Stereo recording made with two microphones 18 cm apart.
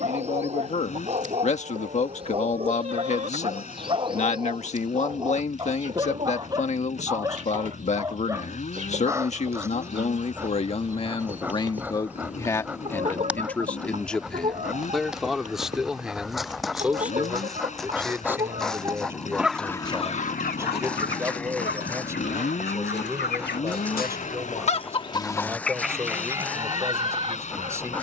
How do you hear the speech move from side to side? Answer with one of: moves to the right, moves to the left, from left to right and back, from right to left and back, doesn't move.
moves to the right.